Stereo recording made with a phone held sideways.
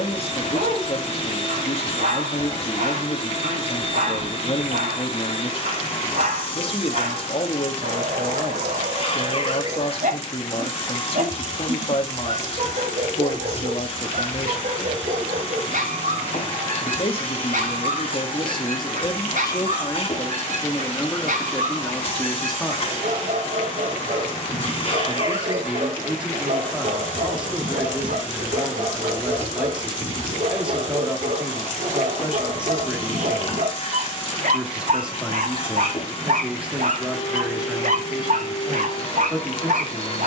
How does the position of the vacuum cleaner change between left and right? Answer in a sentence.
You can hear the vacuum cleaner stay in one place.